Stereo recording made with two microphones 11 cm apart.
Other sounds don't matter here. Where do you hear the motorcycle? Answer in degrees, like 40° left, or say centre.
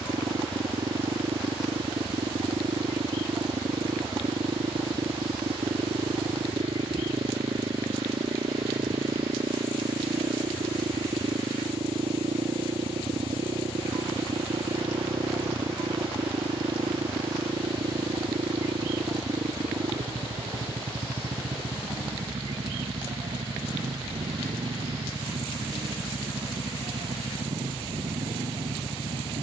80° right.